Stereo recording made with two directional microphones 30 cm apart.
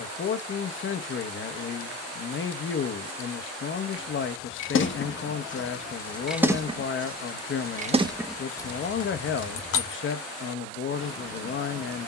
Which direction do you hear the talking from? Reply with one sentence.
You can hear the talking on the left.